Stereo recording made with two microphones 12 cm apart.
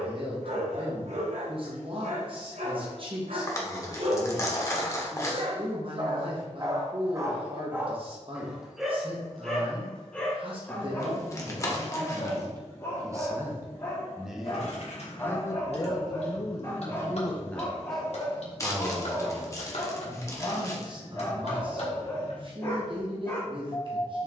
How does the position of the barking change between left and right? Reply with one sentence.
You can hear the barking go from the right side to the left.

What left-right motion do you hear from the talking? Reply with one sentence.
You can hear the talking go left and come back.